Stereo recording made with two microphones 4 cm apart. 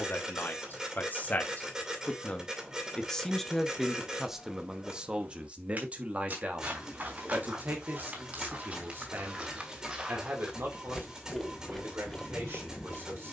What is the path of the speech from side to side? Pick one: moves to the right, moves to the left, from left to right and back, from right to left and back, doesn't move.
moves to the right.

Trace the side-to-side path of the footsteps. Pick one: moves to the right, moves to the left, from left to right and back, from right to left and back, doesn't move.
from left to right and back.